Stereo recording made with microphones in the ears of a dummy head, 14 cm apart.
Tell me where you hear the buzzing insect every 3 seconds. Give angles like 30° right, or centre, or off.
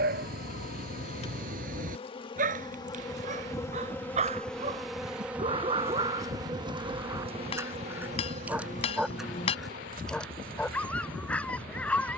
40° left, centre, 40° right, 60° right.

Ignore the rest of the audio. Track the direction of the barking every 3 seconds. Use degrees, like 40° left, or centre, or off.
60° right, 40° right, 20° right, 10° left.